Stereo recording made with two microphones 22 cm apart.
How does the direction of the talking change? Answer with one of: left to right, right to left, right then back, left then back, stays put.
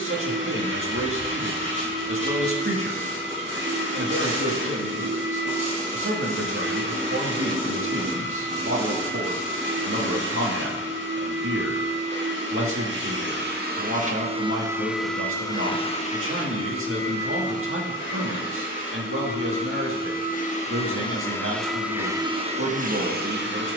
stays put.